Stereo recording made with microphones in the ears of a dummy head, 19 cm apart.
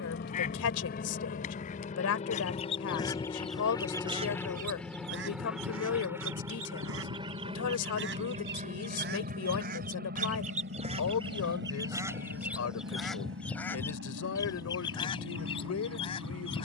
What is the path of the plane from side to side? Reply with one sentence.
You can hear the plane go from the left side to the right.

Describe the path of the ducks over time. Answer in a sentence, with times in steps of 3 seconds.
In this clip you hear the ducks on the left from 0 s, on the right from 3 s, in the centre from 12 s and on the left from 15 s.